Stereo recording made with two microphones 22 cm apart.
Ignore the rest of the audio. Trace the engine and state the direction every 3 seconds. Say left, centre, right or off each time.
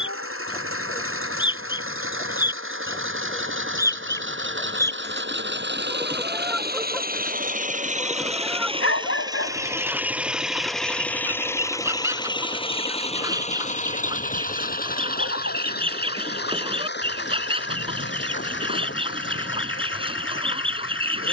right, right, right, centre, left, left, left.